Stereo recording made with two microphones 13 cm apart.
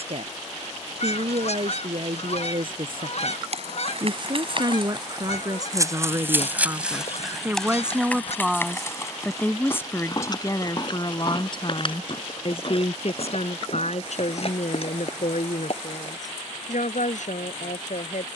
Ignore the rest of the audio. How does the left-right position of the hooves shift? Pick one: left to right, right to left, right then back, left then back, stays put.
right to left.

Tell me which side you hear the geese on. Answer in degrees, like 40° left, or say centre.
60° left.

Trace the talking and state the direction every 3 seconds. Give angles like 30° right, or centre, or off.
50° right, 30° right, 10° right, 30° left, 60° left, 70° left.